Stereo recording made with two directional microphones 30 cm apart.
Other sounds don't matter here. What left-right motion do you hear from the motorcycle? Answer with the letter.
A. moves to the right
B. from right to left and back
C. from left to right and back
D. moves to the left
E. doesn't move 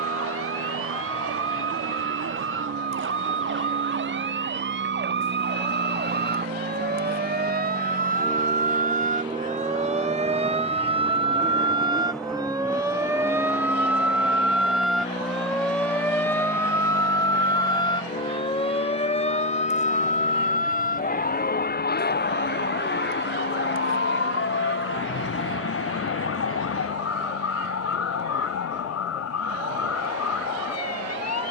D.